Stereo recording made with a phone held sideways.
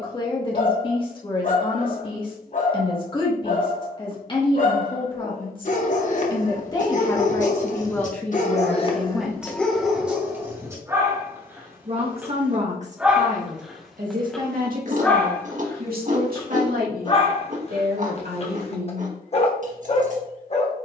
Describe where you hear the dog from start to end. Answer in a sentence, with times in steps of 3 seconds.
You can hear the dog on the left from 0 s, in the centre from 9 s and on the left from 15 s.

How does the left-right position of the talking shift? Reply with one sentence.
You can hear the talking travel towards the right.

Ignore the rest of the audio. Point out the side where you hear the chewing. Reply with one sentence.
In this clip you hear the chewing on the right.